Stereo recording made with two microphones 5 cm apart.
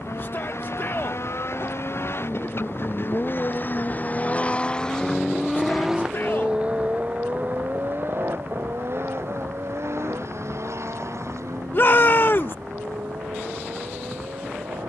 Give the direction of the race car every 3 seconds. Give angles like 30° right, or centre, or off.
60° left, 20° left, 40° right, 60° right, 70° right.